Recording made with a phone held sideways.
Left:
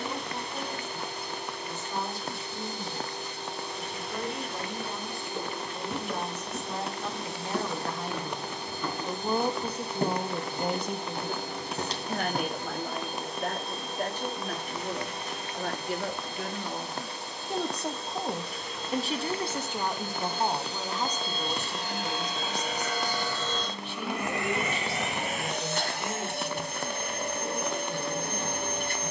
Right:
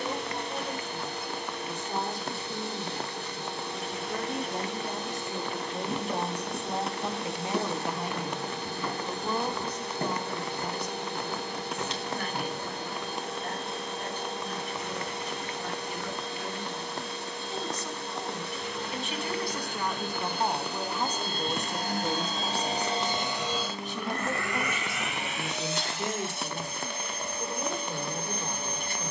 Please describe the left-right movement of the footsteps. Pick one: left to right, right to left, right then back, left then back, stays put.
right to left.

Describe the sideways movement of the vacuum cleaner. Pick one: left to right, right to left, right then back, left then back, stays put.
right to left.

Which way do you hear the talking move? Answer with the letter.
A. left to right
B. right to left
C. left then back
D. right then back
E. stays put
C.